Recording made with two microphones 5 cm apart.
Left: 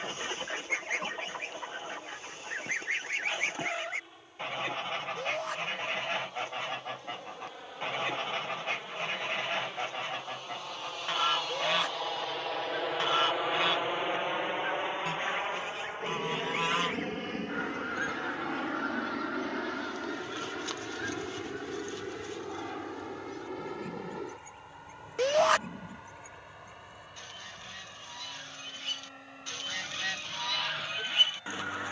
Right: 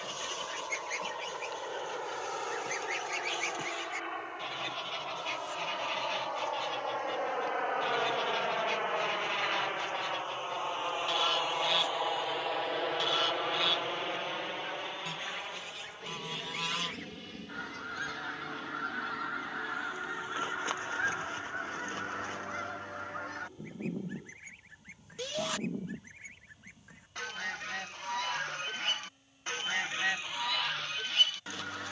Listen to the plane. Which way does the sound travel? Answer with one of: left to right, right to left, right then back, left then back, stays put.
right to left.